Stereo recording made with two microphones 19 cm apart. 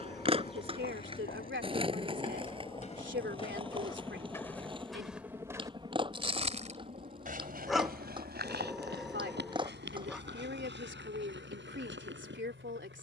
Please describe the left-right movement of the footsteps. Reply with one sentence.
In this clip you hear the footsteps travel towards the right.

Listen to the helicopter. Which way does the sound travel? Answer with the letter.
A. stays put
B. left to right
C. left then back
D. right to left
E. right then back
B.